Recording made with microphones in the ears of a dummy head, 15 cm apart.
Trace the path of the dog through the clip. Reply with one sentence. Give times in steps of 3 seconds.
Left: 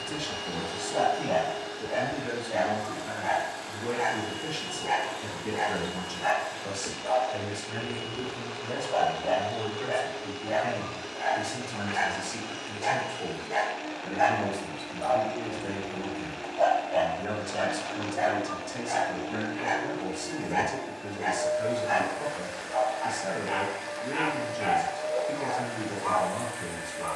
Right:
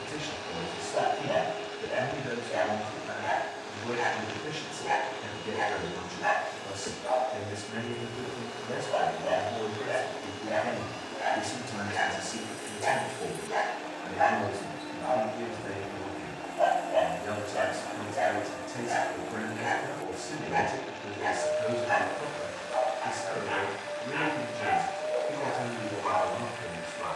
In this clip you hear the dog on the right from 0 s, in the centre from 12 s and on the right from 18 s.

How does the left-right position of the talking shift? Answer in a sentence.
In this clip you hear the talking move from left to right and back again.